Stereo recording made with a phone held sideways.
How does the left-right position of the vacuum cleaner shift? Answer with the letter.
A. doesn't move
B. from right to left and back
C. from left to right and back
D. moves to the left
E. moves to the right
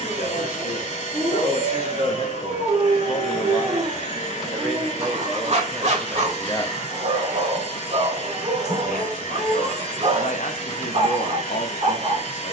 A.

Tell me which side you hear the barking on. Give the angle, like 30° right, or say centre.
50° right.